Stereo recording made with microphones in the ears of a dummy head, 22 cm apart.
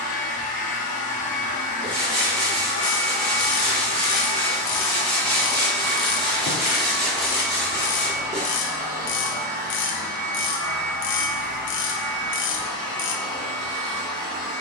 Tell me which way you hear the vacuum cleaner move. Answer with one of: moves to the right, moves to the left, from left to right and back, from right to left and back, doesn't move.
moves to the right.